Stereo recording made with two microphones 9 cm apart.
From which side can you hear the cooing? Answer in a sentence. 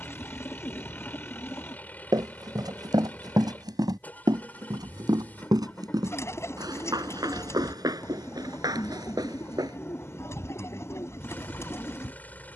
You can hear the cooing on the left.